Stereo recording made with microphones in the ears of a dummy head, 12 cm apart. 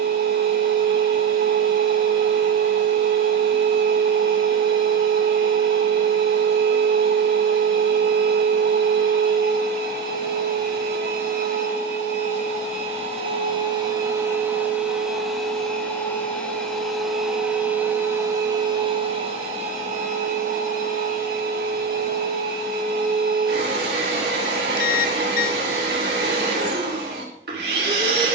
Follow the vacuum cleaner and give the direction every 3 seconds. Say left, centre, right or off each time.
right, right, right, right, right, centre, right, right, right, right.